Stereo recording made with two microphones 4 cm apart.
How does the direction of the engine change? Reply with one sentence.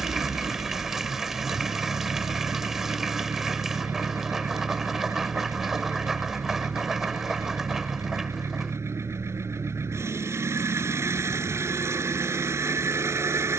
You can hear the engine stay put.